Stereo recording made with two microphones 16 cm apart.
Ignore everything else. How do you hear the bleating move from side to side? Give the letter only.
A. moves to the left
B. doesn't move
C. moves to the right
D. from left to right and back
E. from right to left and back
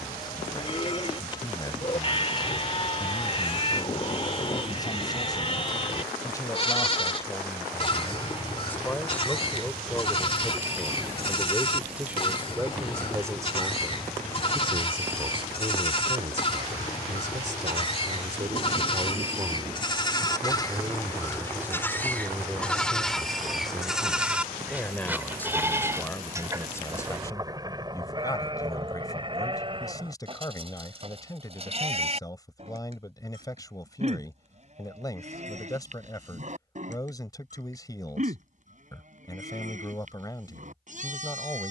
C.